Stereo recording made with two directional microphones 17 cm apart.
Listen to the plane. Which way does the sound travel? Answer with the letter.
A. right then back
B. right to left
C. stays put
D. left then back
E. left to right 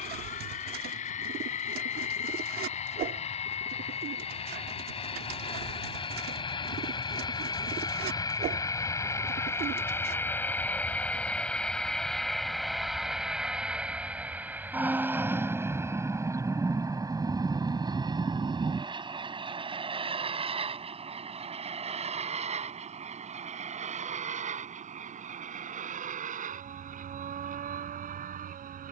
E.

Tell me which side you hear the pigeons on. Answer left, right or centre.
right.